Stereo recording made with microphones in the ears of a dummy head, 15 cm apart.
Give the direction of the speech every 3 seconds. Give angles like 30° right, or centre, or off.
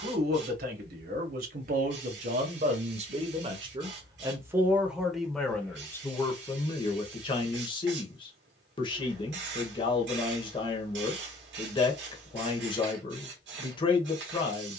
60° right, 10° right, 30° left, 30° left, 30° left.